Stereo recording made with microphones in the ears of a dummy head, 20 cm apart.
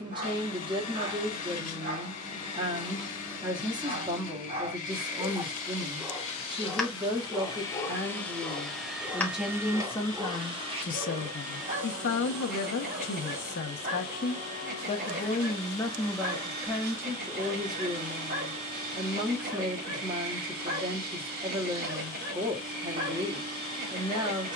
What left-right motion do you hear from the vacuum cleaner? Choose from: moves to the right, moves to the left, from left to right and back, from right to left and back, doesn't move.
moves to the right.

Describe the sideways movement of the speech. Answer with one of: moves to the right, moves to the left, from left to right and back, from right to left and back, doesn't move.
from right to left and back.